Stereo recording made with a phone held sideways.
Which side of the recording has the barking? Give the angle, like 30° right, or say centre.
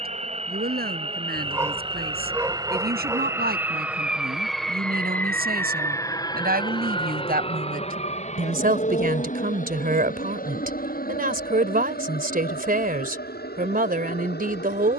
20° right.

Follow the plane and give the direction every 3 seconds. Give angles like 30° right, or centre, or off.
40° right, centre, 30° left, 50° left, 60° left.